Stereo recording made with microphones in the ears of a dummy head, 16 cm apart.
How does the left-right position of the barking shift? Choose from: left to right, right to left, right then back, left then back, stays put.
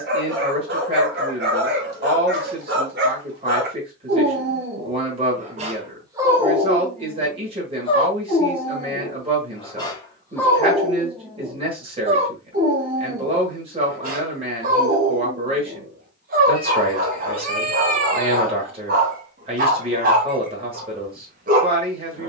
left then back.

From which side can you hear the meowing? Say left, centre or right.
right.